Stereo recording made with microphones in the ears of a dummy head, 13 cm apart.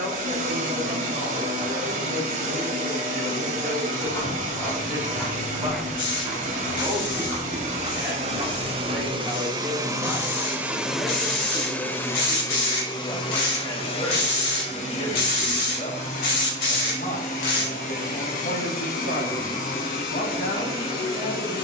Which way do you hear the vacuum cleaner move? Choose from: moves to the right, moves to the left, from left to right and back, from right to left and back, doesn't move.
moves to the left.